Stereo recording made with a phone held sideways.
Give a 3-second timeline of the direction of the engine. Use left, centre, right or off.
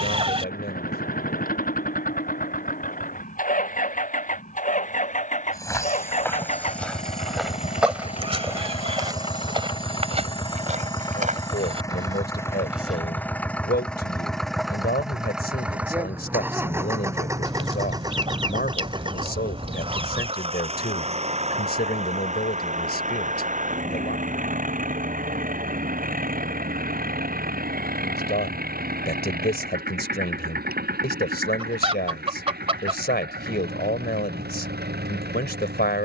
left, left, left, left, centre, centre, right, right, right, right, right, right.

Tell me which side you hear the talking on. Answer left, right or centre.
left.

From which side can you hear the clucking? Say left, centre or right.
right.